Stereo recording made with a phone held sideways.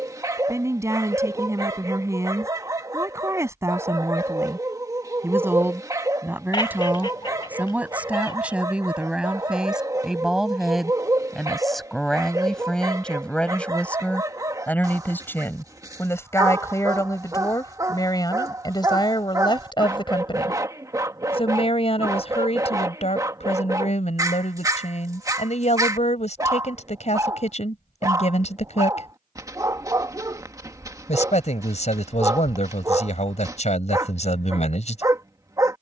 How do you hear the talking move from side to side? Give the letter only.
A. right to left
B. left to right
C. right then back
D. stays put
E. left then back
A.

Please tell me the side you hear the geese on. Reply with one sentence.
In this clip you hear the geese on the left.